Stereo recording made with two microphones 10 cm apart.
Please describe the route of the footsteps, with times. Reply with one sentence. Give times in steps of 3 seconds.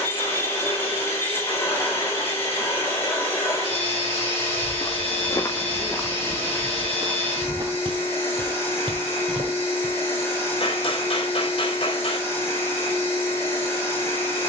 You can hear the footsteps not at all from 0 s, on the left from 3 s, on the right from 6 s and not at all from 12 s.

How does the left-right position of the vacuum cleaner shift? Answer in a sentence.
You can hear the vacuum cleaner stay put.